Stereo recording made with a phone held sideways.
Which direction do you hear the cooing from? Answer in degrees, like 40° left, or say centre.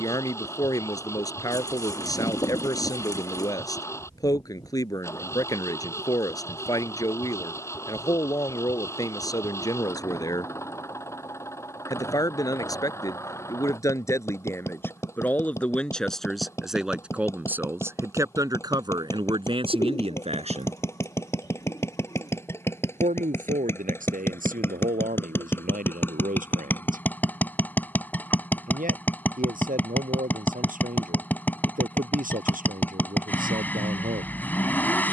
30° left.